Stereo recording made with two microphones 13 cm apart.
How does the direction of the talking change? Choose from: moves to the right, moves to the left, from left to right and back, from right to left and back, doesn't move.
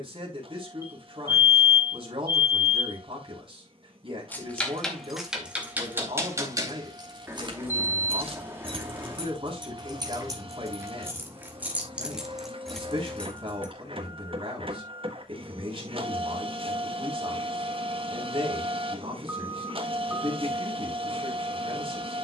doesn't move.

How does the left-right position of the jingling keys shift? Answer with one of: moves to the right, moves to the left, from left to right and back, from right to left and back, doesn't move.
from left to right and back.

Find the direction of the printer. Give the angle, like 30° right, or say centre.
40° right.